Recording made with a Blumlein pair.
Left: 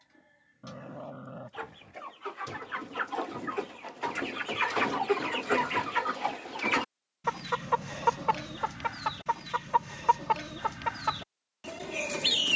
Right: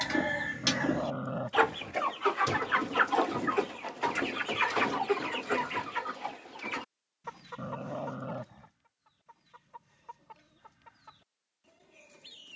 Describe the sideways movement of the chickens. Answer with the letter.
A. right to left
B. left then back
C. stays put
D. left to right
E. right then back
A.